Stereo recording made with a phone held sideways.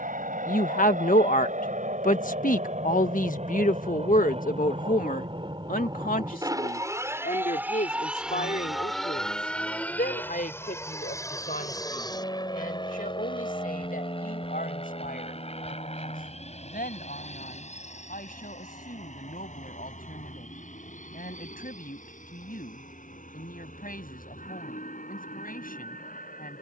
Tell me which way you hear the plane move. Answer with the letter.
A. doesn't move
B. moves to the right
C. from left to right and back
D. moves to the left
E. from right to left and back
D.